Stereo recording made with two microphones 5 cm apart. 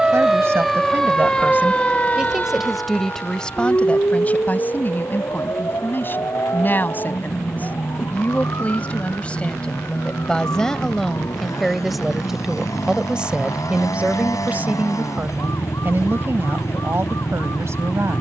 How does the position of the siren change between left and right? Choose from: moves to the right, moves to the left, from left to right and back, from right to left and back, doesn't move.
moves to the left.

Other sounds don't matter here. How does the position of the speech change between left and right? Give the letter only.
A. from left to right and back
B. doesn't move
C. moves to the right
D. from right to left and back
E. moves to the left
D.